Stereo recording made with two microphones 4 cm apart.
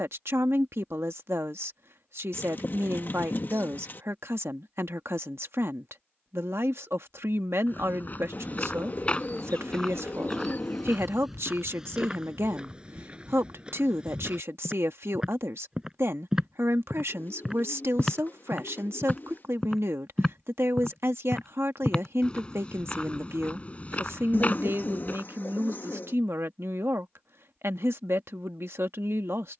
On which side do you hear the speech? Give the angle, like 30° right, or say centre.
70° right.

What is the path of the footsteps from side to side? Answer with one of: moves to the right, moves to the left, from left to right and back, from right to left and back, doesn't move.
from left to right and back.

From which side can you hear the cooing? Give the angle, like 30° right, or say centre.
50° left.